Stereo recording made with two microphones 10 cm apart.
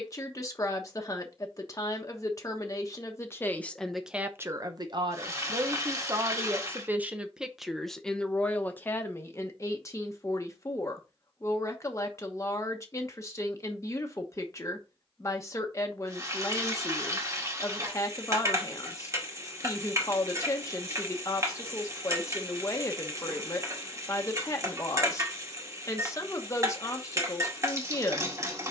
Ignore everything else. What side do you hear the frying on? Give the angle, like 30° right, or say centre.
30° right.